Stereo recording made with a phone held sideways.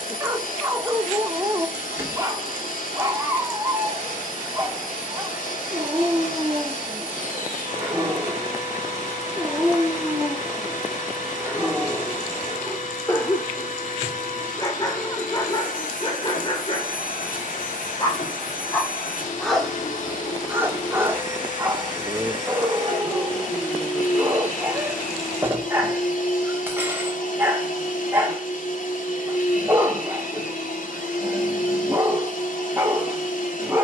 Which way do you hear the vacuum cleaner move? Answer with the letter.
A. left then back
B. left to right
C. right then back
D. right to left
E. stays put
E.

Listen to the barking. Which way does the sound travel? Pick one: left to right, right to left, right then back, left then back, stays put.
left then back.